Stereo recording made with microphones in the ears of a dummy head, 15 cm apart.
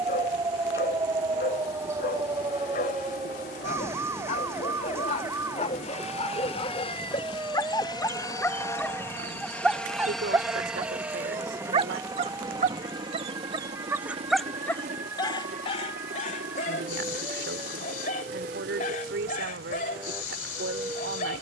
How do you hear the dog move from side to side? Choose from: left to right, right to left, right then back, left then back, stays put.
right then back.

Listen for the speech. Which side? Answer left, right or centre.
right.